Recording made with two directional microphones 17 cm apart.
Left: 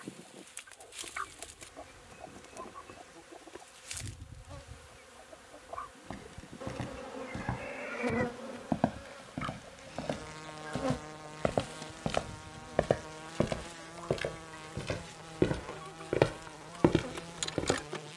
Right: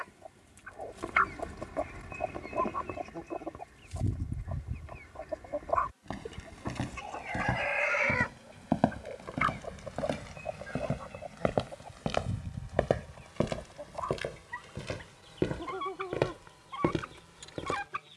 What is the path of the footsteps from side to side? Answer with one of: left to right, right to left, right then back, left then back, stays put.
right to left.